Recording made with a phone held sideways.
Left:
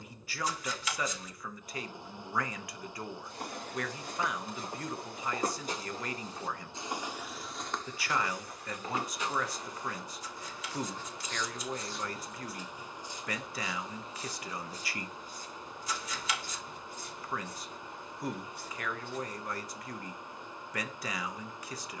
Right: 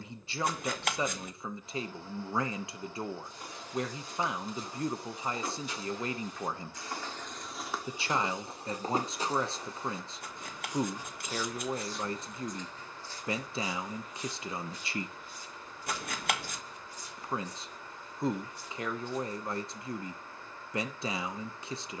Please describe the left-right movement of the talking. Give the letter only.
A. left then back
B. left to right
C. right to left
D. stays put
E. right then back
D.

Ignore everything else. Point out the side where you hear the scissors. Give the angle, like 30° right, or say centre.
60° right.